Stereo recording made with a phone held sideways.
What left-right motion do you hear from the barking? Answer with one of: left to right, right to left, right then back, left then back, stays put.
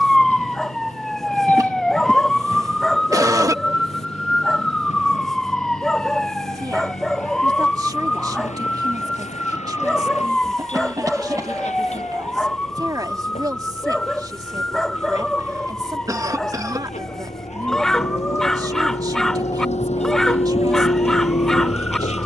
stays put.